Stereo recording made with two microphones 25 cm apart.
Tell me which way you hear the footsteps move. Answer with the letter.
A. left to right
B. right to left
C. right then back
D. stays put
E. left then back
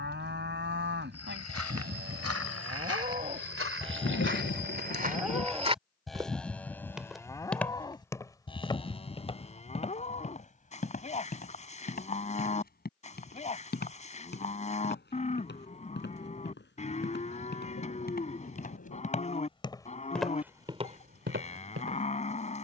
E.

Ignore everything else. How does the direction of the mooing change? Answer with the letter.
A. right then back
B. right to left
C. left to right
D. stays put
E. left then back
B.